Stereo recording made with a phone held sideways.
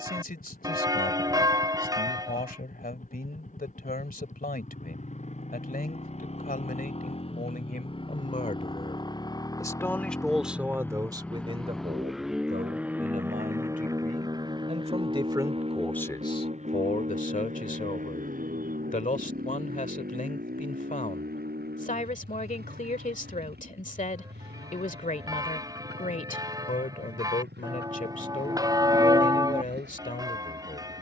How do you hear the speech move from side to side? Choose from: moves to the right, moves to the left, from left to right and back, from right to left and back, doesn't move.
from left to right and back.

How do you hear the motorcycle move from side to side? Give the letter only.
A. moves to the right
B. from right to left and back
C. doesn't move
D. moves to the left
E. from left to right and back
A.